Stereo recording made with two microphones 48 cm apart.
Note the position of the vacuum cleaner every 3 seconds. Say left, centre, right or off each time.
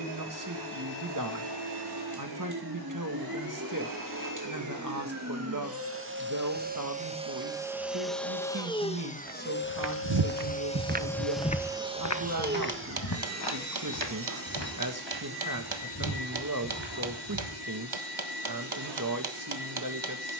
right, right, centre, centre, right, right, right.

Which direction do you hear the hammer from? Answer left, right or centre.
right.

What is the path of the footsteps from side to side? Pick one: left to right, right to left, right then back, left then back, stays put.
right to left.